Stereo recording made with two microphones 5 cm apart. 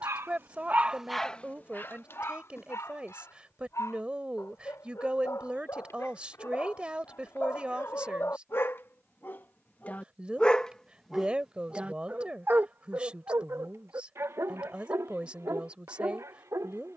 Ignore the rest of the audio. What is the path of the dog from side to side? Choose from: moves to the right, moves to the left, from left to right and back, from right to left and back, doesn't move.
from right to left and back.